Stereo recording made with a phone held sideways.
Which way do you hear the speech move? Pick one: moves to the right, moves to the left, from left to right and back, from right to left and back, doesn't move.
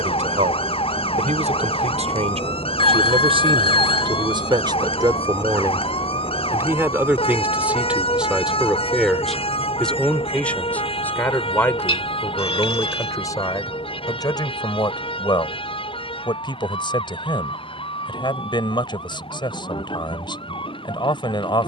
moves to the left.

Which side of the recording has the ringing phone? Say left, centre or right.
left.